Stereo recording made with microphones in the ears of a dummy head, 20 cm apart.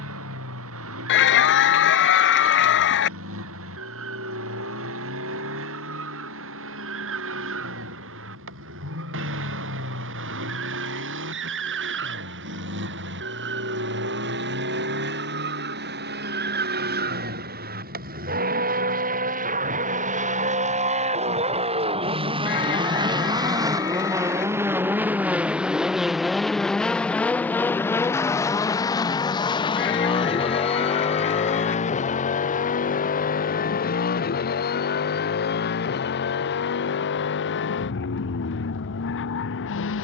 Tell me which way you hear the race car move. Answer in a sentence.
In this clip you hear the race car move to the left.